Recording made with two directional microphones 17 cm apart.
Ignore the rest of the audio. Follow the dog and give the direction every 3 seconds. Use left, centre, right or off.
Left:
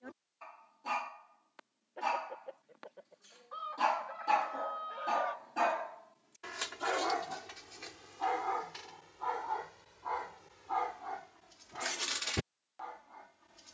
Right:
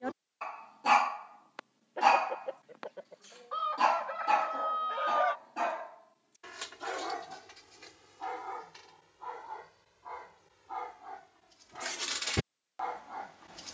right, centre, left, left, right.